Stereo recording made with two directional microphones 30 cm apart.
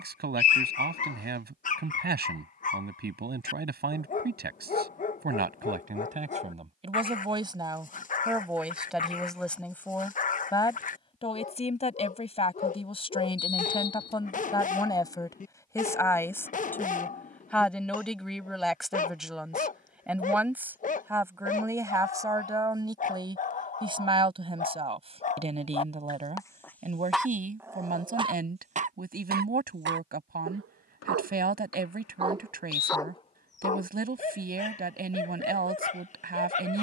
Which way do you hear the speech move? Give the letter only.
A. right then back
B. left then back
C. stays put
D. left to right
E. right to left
B.